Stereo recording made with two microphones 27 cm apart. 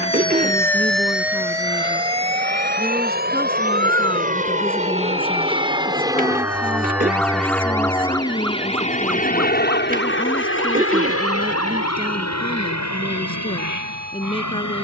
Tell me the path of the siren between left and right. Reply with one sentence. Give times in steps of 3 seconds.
You can hear the siren in the centre from 0 s and on the right from 3 s.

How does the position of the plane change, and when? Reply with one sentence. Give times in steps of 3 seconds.
You can hear the plane on the right from 0 s, in the centre from 6 s and on the left from 9 s.